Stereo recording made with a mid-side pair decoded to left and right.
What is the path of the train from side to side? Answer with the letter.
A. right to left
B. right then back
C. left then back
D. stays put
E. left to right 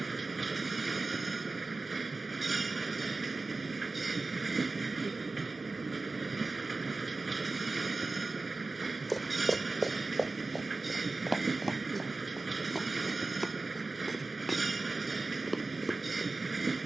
D.